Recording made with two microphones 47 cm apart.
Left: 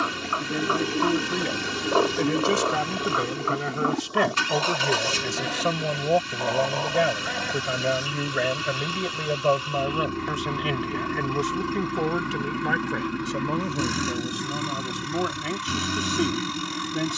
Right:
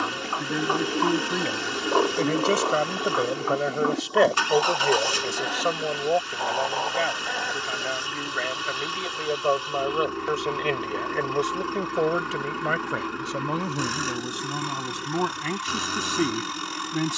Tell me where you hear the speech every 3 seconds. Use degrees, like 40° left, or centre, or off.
centre, 30° left, 60° left, 40° left, centre, 10° right.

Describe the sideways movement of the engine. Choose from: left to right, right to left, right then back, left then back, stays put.
stays put.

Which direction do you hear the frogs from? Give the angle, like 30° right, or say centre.
centre.